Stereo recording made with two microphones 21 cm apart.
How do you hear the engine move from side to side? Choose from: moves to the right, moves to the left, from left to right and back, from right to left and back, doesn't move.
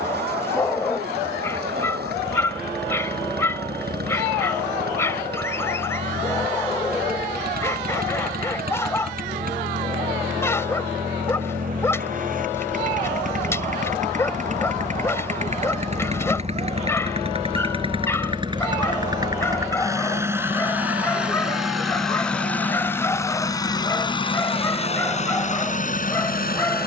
moves to the left.